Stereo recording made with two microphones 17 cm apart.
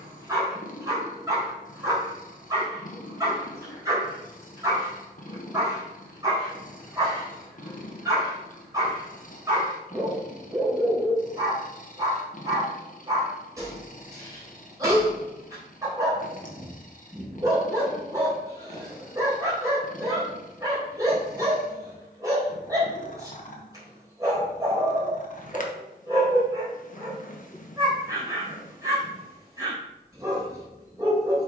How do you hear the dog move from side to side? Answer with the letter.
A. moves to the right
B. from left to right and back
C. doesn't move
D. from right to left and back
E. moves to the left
C.